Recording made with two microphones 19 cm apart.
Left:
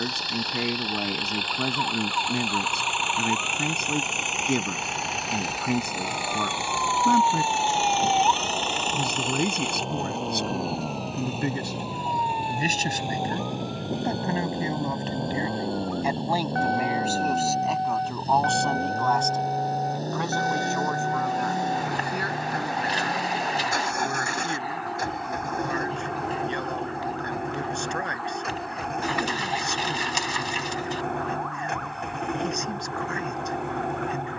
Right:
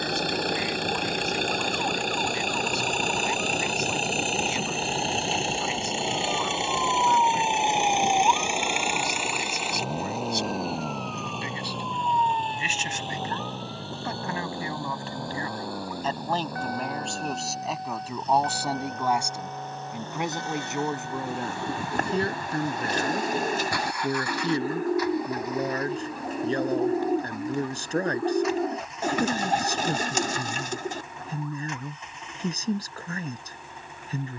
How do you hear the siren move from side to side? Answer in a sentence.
You can hear the siren move to the left.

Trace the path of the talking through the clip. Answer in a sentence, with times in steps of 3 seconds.
In this clip you hear the talking on the left from 0 s, in the centre from 15 s and on the right from 21 s.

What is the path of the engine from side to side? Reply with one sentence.
You can hear the engine go from the right side to the left.